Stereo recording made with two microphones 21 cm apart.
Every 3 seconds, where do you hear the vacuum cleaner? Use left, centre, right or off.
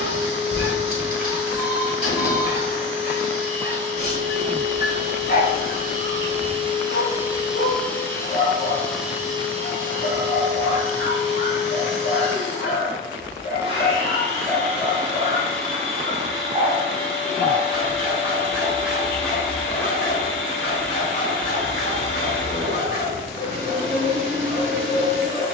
right, right, centre, right, right, right, right, right, right.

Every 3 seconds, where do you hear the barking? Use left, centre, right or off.
left, left, left, left, left, right, centre, left, left.